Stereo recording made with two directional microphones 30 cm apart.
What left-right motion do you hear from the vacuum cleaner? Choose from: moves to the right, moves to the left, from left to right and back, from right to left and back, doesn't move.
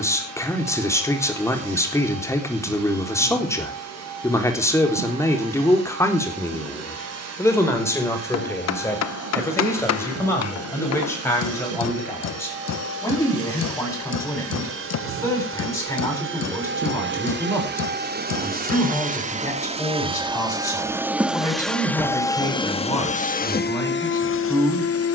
moves to the left.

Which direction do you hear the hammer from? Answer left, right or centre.
left.